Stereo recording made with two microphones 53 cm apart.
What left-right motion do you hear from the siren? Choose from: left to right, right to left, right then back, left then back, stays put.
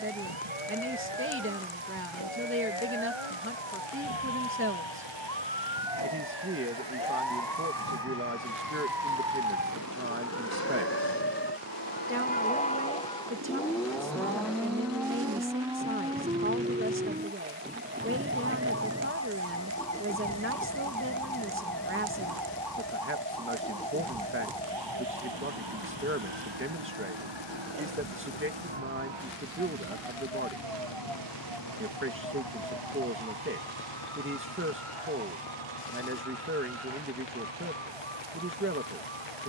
left to right.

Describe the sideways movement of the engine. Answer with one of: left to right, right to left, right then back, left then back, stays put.
right to left.